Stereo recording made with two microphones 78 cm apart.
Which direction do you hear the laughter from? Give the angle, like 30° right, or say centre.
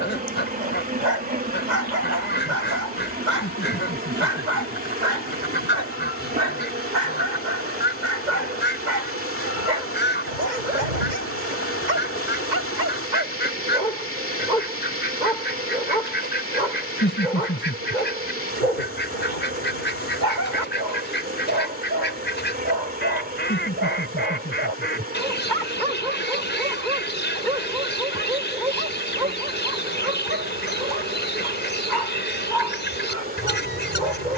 10° left.